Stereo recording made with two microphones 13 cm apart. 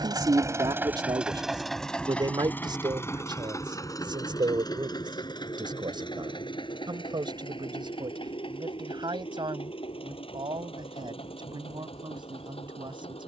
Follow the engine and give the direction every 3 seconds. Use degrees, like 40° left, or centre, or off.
centre, 30° left, 40° left, 50° left, 50° left.